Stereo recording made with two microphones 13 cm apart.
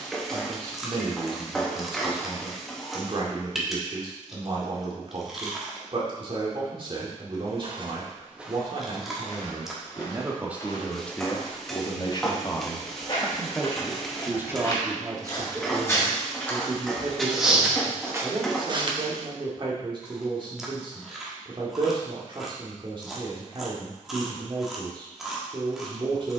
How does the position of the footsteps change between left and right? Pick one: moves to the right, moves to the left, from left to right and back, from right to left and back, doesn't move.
from right to left and back.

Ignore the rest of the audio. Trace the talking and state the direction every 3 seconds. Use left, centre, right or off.
right, right, right, centre, centre, right, right, right, right.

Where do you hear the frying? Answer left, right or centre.
centre.